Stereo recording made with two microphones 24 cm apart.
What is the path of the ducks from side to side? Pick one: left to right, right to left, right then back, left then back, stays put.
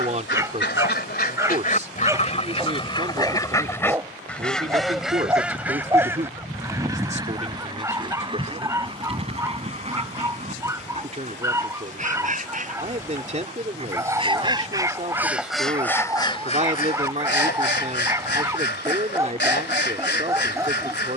right then back.